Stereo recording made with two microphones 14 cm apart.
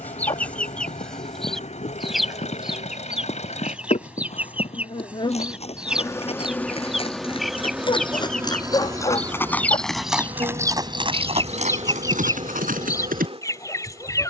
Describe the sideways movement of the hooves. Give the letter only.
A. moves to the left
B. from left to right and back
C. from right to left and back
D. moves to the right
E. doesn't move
D.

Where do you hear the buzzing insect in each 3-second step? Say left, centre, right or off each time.
left, left, centre, right, right.